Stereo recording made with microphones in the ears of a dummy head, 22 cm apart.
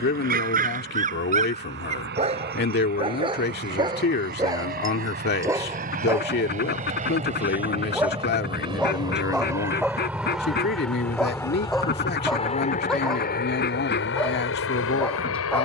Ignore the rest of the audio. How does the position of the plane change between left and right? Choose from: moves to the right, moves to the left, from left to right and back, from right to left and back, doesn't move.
moves to the left.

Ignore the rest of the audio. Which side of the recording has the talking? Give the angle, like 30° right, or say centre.
40° left.